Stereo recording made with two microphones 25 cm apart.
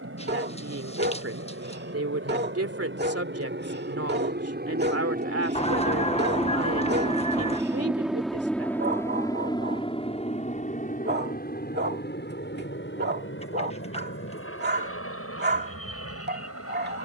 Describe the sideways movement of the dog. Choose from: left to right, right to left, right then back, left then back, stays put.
stays put.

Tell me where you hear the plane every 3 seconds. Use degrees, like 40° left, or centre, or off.
60° right, 40° right, 10° right, 30° left, 50° left, 60° left.